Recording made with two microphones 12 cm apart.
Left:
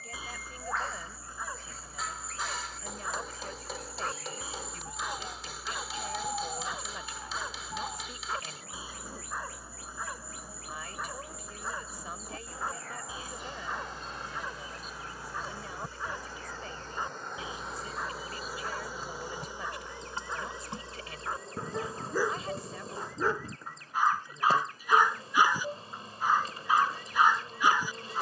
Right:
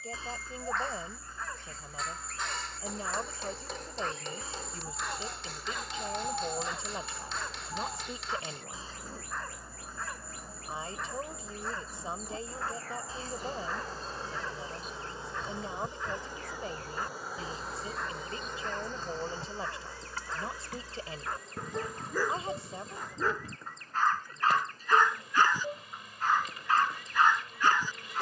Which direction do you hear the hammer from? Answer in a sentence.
In this clip you hear the hammer in the centre.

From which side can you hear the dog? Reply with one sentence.
You can hear the dog in the centre.